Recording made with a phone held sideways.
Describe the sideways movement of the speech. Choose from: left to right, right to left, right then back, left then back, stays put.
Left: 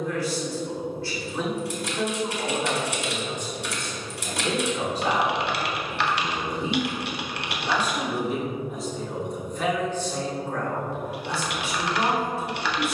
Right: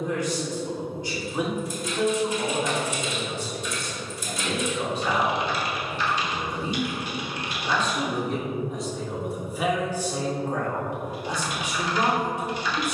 left then back.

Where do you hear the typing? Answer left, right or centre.
left.